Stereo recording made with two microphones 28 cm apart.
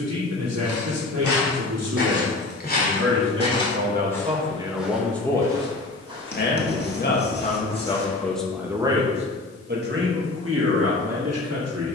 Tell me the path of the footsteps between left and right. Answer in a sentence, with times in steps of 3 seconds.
You can hear the footsteps on the left from 0 s, in the centre from 3 s, on the right from 6 s and not at all from 9 s.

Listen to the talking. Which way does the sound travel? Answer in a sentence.
In this clip you hear the talking go left and come back.